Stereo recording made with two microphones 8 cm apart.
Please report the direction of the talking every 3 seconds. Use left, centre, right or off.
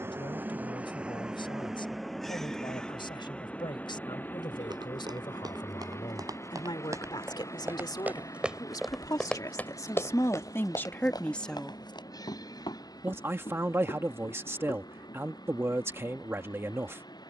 left, left, left, left, right, right.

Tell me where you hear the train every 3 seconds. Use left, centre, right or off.
centre, left, left, left, left, left.